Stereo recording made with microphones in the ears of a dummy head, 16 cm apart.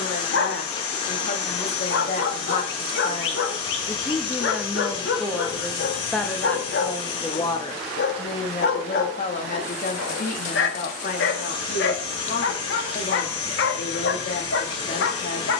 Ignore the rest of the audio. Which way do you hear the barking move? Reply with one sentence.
You can hear the barking stay put.